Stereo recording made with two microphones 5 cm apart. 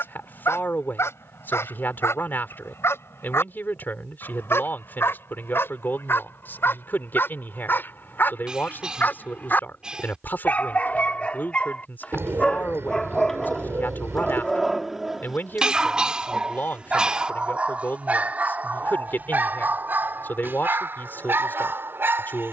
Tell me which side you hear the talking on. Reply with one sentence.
In this clip you hear the talking on the left.